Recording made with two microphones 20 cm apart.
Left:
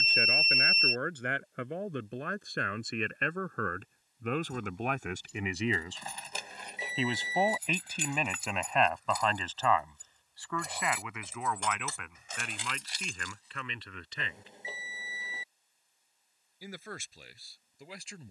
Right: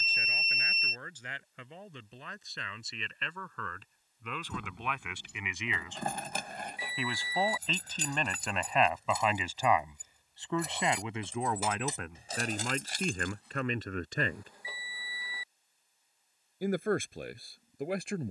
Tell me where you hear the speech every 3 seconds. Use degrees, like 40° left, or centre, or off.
70° left, 50° left, 10° left, 20° right, 50° right, 60° right.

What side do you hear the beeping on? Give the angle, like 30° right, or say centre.
20° left.